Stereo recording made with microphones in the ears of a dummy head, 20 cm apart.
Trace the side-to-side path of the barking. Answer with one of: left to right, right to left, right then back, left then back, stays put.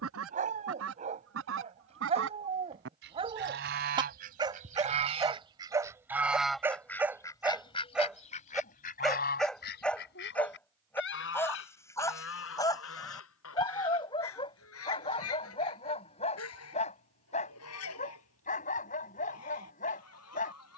right to left.